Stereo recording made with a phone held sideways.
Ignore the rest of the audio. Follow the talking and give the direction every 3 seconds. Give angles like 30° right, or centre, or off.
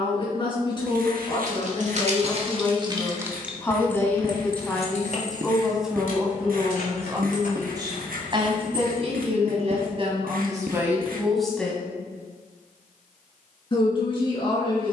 30° left, 10° left, 20° right, 20° right, 30° left.